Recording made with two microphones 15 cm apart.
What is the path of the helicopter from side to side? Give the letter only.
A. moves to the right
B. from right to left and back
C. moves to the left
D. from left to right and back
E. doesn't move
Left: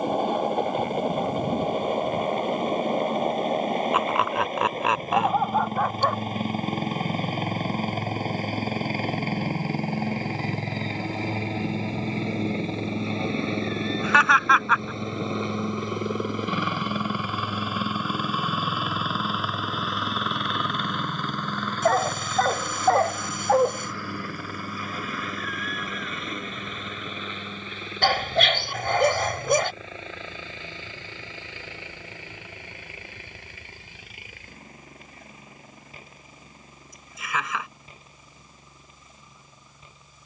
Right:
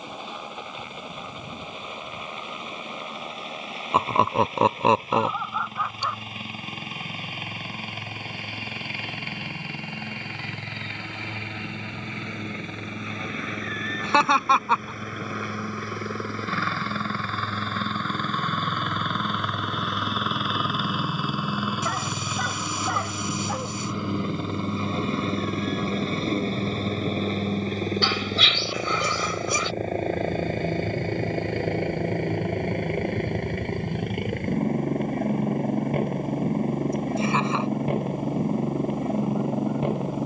A.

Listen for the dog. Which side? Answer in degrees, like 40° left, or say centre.
60° left.